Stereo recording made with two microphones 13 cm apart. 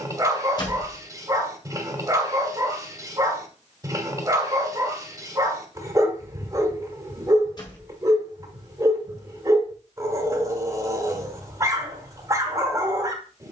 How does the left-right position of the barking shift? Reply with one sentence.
In this clip you hear the barking stay put.